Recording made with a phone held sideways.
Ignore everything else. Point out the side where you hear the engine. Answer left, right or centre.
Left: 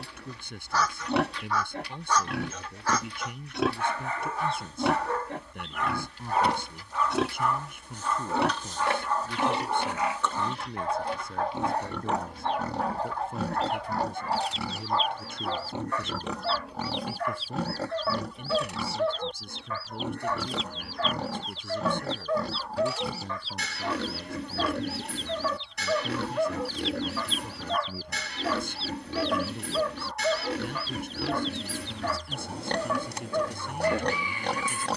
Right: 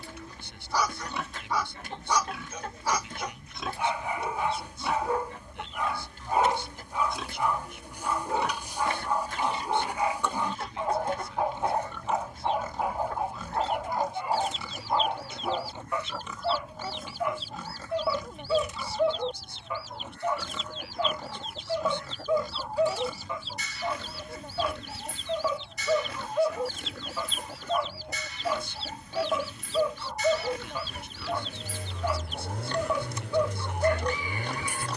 right.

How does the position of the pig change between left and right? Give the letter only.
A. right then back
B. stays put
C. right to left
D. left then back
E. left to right
B.